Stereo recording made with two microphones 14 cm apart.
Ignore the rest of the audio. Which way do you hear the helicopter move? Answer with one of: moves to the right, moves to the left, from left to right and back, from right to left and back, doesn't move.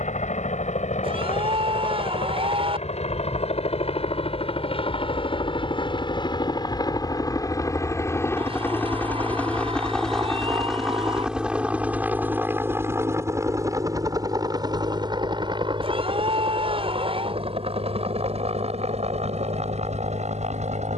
moves to the right.